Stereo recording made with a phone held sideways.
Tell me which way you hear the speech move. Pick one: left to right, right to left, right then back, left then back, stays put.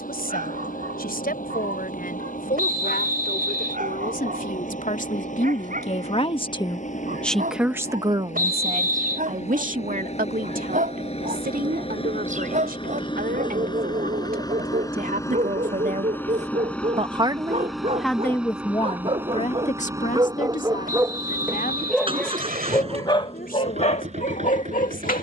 right then back.